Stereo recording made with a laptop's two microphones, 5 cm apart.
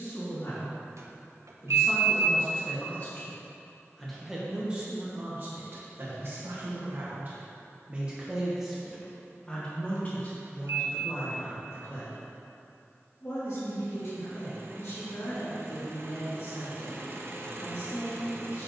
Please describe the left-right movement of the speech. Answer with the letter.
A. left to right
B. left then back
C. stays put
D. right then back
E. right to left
D.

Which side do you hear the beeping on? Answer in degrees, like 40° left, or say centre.
70° right.